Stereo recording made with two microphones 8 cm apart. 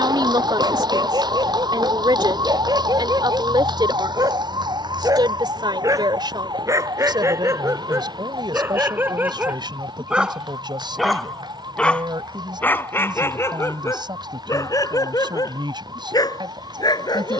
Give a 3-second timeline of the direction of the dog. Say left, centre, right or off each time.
right, right, right, centre, left, left.